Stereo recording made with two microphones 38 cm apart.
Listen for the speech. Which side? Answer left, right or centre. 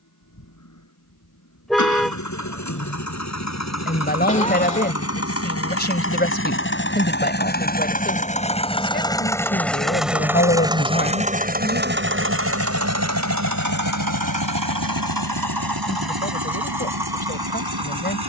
left.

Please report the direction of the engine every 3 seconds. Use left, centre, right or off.
left, left, left, centre, right, right.